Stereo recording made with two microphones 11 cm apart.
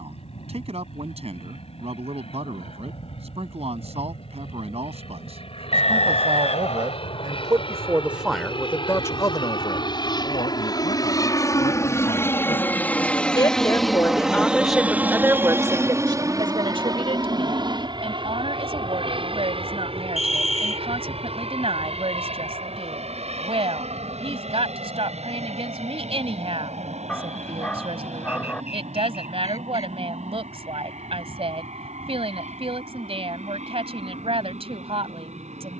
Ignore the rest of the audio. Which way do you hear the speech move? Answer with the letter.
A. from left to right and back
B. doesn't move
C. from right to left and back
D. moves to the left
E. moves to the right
C.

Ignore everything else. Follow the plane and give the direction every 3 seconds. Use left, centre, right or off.
left, left, left, left, centre, right, right, right, right, right, right, right.